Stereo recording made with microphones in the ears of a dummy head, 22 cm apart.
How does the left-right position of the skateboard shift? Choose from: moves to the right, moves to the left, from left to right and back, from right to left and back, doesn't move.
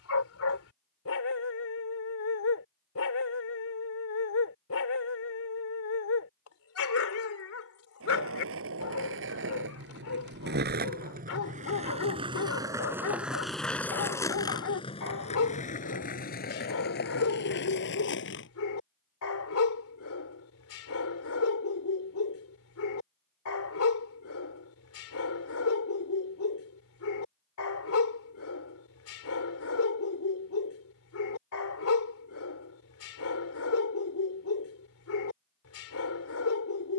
moves to the left.